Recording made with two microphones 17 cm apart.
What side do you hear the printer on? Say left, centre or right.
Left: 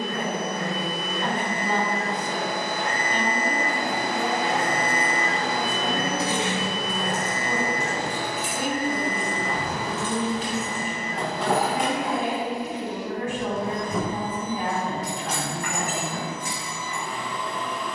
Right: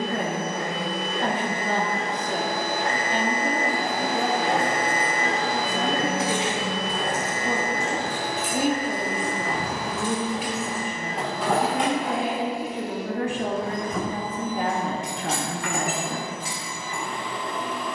right.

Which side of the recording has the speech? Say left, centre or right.
right.